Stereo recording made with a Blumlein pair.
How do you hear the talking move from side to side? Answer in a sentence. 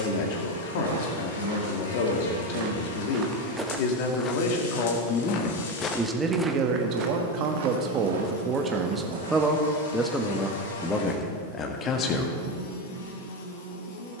In this clip you hear the talking move from left to right and back again.